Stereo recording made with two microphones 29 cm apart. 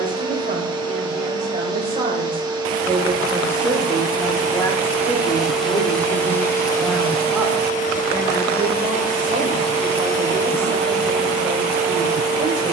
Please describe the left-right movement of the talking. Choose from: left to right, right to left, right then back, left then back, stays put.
left then back.